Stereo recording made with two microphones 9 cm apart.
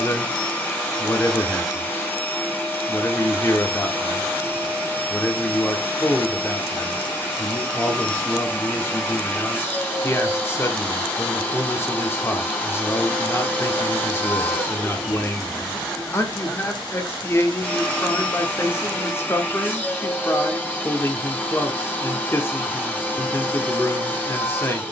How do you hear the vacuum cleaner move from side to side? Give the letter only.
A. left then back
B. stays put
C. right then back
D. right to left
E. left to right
B.